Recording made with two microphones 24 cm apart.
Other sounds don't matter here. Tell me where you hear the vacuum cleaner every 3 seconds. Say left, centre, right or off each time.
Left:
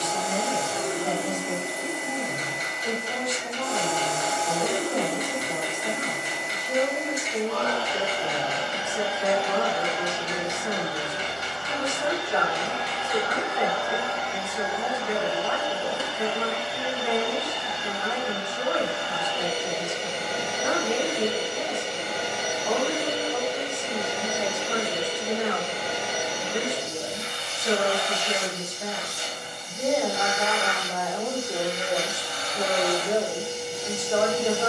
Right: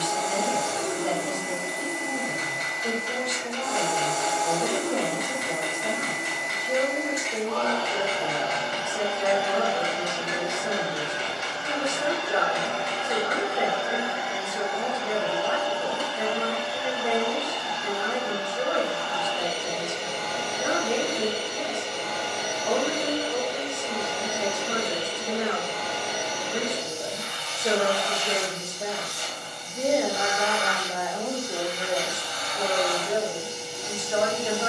left, left, left, right, right, left, left, left, left, left, left, left.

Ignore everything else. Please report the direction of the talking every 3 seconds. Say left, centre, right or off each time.
right, right, right, right, right, right, right, right, right, right, centre, left.